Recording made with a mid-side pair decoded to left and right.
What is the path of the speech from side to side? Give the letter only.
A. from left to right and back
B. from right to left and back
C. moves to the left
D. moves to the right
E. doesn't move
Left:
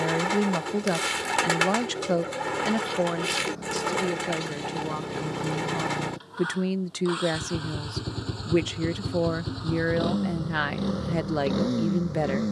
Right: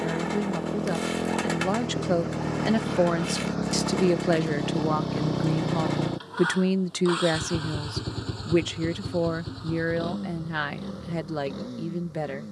A.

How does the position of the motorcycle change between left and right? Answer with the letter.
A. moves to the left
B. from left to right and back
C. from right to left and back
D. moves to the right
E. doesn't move
A.